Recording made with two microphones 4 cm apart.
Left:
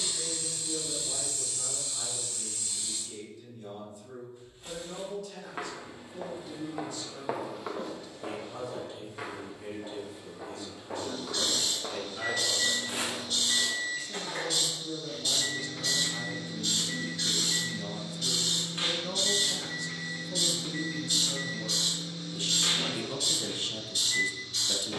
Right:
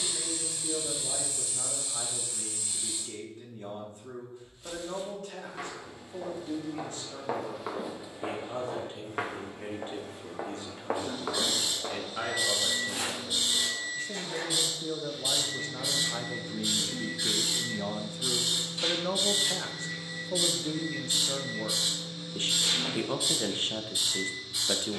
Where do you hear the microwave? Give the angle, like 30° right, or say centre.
50° left.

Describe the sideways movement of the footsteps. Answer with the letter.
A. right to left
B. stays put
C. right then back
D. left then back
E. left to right
C.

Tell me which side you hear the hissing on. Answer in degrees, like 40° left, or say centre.
10° right.